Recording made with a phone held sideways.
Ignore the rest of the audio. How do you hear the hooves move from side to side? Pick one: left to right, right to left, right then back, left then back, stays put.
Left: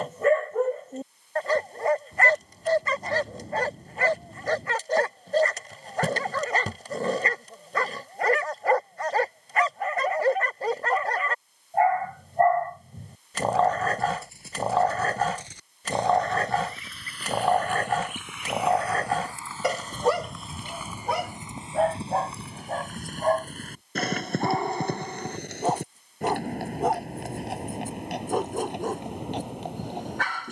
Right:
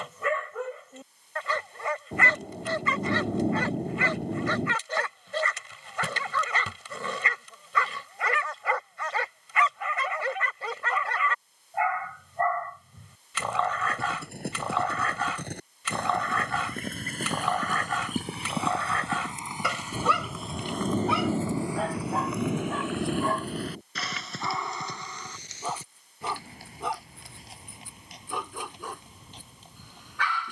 right to left.